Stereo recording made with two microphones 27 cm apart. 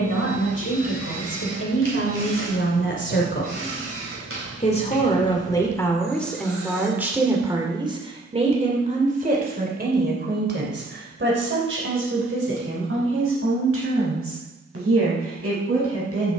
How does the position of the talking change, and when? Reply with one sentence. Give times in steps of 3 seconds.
You can hear the talking on the left from 0 s, in the centre from 6 s and on the right from 9 s.